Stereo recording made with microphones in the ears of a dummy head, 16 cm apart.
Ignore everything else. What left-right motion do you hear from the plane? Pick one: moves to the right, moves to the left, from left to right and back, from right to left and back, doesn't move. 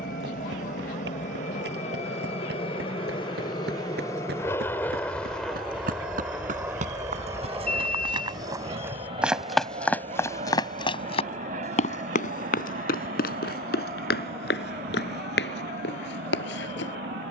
moves to the right.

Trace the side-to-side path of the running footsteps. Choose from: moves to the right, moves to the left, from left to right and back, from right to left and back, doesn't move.
moves to the left.